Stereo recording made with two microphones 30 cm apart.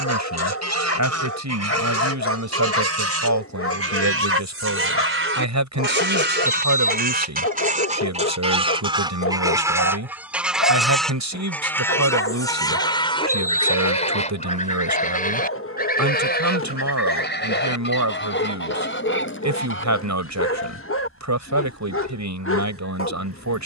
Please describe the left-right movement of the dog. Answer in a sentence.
In this clip you hear the dog stay put.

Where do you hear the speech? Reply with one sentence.
You can hear the speech on the right.